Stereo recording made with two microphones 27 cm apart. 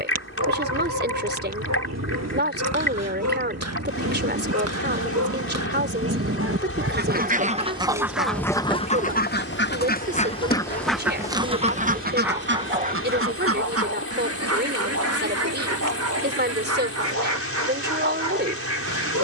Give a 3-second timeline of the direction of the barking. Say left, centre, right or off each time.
right, right, right, left, right, right, right.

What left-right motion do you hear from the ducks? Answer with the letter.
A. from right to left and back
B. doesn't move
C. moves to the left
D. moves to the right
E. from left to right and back
A.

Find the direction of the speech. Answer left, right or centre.
right.